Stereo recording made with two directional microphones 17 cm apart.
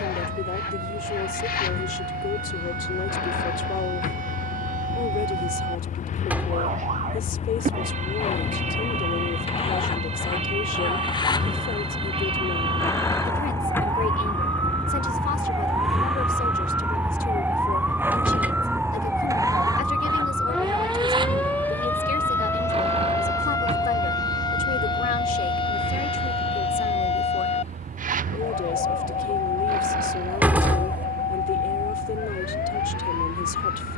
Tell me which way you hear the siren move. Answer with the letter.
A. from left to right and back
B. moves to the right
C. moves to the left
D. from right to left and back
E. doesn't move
C.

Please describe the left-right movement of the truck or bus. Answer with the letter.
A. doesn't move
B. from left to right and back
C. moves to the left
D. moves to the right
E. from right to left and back
D.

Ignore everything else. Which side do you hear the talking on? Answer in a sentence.
You can hear the talking on the left.